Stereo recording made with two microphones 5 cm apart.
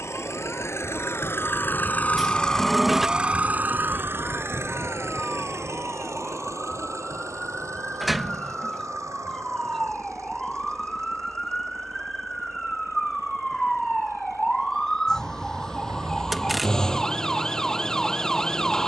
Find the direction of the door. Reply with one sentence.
In this clip you hear the door in the centre.